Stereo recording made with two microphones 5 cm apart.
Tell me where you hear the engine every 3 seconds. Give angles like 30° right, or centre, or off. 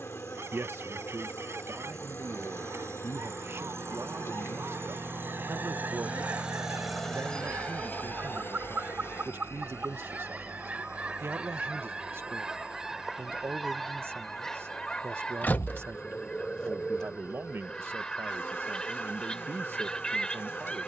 70° right, 60° right, 20° left, 70° left, 80° left, 80° left, 80° left.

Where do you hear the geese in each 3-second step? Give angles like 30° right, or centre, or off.
60° right, 60° right, 50° right, 30° right, centre, 20° left, 20° left.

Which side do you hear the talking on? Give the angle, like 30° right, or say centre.
50° right.